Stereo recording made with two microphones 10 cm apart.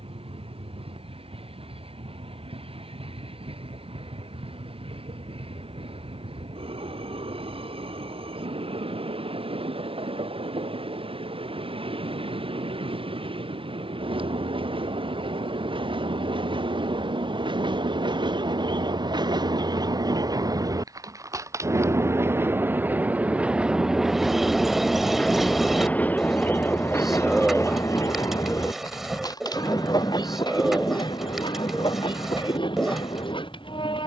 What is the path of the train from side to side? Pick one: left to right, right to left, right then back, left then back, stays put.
right to left.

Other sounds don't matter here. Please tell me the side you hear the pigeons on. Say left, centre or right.
centre.